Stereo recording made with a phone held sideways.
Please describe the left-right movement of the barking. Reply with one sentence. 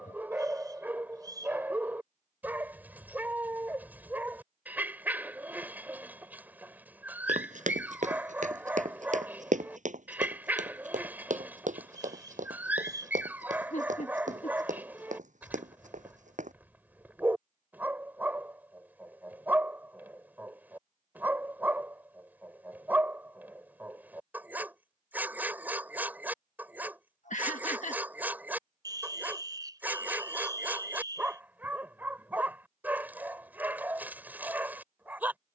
In this clip you hear the barking stay put.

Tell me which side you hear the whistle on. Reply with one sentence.
You can hear the whistle on the right.